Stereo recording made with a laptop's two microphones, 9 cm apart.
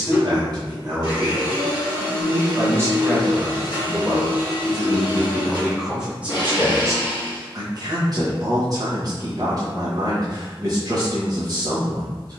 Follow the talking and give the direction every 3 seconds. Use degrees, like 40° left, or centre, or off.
40° right, 10° right, 30° right, 40° right.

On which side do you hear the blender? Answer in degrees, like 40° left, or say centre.
60° left.